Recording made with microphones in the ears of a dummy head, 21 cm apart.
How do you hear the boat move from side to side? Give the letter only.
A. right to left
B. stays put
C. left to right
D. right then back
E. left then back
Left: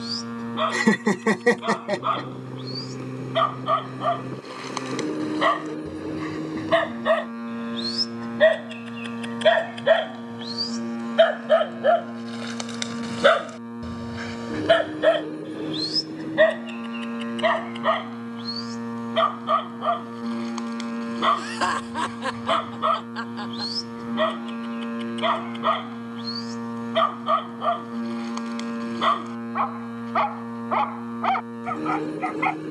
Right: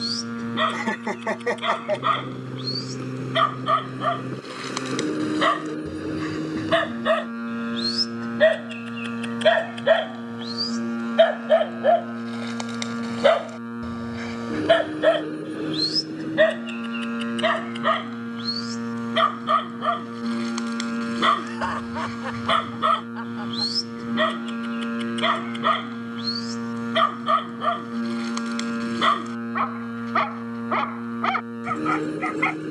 B.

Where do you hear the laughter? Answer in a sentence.
In this clip you hear the laughter on the left.